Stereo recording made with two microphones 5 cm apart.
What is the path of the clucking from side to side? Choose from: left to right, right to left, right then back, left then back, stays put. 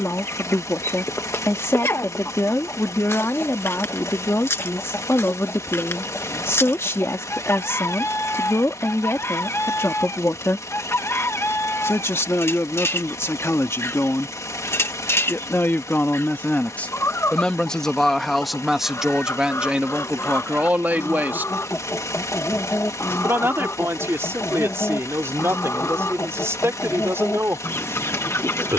stays put.